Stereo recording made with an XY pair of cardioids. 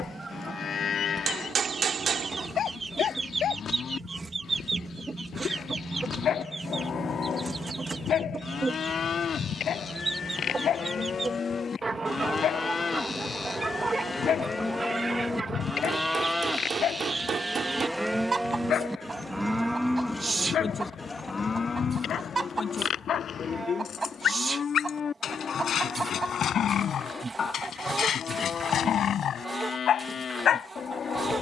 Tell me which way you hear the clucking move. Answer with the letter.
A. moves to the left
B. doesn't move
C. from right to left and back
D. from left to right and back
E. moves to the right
B.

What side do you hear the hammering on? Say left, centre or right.
right.